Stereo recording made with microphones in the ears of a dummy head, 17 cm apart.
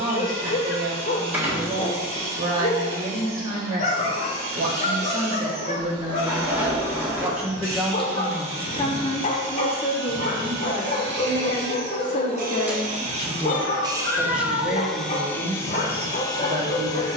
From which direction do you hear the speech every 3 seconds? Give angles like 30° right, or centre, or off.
40° right, 40° right, centre, 40° left, 10° left, 30° right.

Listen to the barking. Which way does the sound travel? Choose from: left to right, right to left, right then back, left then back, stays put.
stays put.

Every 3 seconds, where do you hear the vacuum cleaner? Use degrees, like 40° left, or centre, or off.
80° right, 80° right, 80° right, 70° right, 30° right, 20° left.